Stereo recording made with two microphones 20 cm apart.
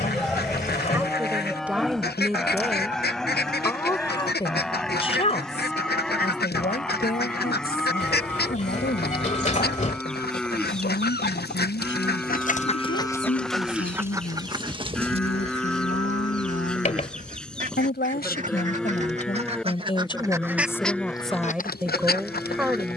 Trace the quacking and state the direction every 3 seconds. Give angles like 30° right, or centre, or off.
50° left, 50° left, 50° left, 50° left, 10° left, 40° right, 30° right, 40° left.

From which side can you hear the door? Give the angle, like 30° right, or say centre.
40° left.